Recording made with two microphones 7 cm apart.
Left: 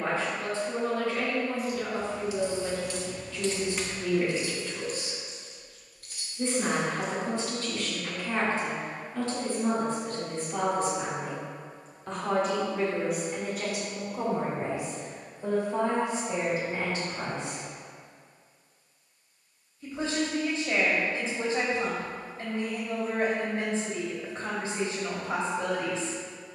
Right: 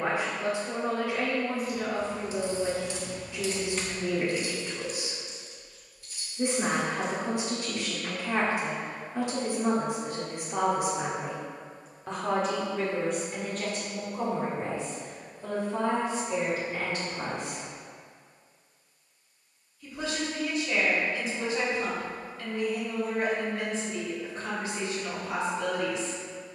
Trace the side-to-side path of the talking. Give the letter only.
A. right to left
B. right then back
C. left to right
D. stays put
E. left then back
A.